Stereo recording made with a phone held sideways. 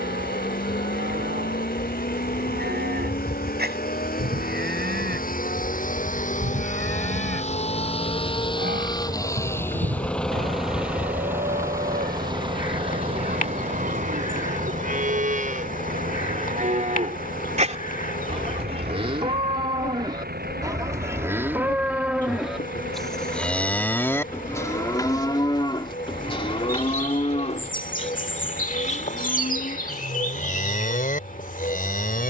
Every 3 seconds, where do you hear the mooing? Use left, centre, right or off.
right, right, right, right, right, right, right, centre, left, left, left.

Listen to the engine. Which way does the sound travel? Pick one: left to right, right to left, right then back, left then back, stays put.
left to right.